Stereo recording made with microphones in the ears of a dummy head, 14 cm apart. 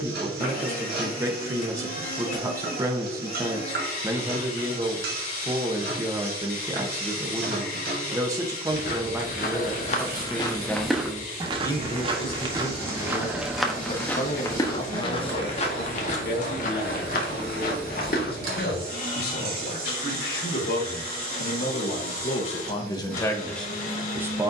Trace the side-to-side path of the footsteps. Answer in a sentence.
You can hear the footsteps go right and come back.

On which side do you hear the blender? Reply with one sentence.
You can hear the blender on the left.